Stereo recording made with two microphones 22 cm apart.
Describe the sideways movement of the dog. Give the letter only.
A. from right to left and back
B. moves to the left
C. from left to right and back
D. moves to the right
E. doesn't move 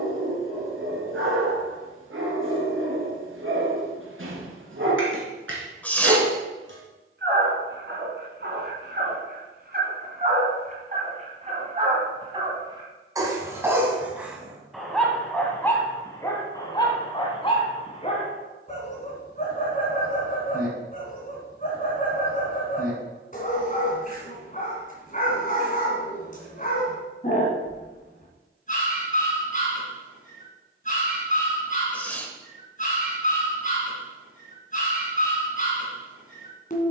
B.